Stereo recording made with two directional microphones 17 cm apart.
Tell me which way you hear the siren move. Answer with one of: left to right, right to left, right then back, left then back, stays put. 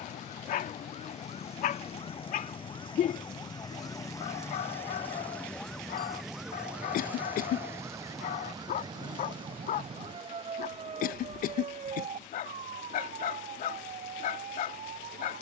left to right.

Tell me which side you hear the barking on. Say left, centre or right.
left.